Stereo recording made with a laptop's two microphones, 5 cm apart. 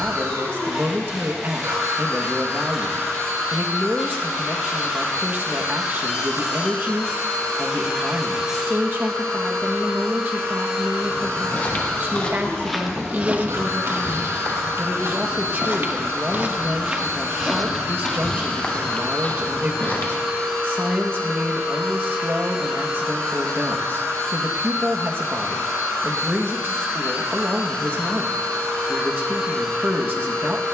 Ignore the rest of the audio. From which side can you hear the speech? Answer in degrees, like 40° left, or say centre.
50° right.